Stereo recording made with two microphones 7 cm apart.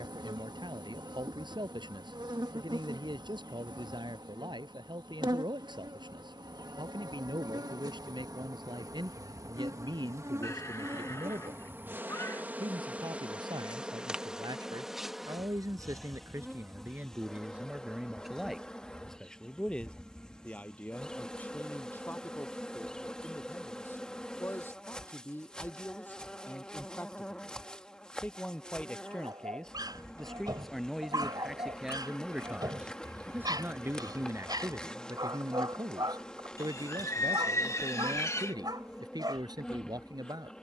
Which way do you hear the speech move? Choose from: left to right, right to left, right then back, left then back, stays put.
left then back.